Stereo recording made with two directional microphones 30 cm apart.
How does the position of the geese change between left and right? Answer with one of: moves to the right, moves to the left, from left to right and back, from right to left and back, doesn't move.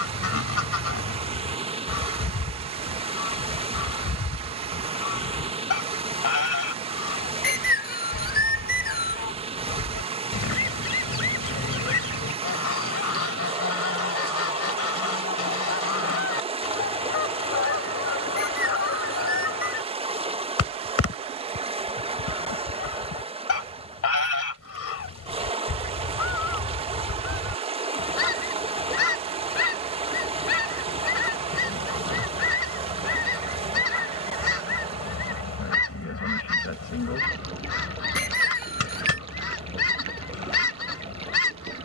doesn't move.